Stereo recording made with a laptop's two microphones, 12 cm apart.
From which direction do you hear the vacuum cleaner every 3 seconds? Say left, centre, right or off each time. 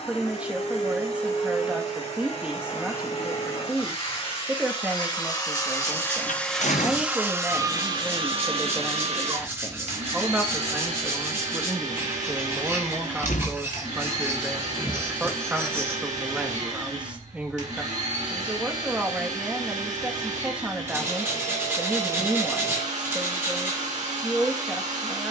left, left, right, right, right, right, right, right, right.